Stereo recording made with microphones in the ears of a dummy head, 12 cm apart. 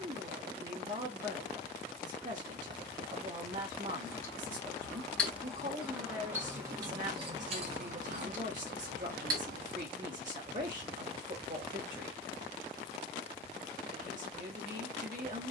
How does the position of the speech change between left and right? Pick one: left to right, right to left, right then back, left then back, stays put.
stays put.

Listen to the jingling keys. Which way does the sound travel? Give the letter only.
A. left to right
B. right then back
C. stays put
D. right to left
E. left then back
A.